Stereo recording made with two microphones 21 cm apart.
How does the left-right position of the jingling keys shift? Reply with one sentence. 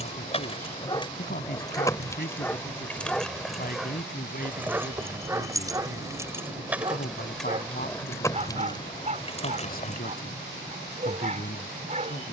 You can hear the jingling keys move from left to right and back again.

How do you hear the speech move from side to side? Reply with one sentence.
In this clip you hear the speech stay put.